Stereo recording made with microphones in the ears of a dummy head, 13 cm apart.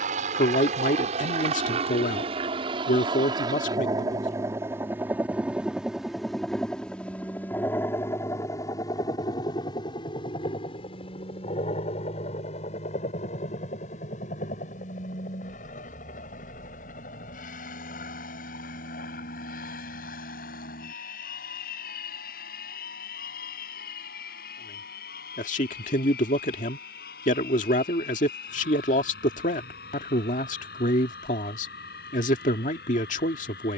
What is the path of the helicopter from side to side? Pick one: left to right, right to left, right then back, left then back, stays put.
right to left.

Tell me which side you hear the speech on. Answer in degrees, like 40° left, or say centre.
50° left.